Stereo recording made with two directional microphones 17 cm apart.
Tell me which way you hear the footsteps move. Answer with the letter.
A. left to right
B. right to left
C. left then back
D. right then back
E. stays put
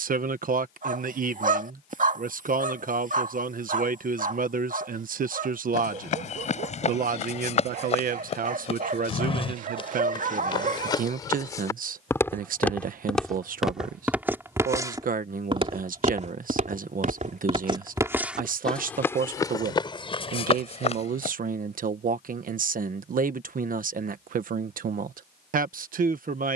D.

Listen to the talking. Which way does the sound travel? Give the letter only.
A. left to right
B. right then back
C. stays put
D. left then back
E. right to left
C.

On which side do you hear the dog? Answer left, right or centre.
right.